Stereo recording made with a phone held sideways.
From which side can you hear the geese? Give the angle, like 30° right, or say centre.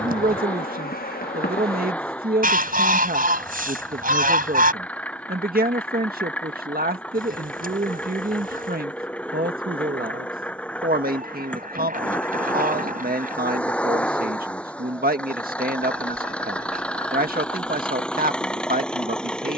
60° right.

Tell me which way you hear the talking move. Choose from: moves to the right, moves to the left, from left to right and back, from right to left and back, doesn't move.
doesn't move.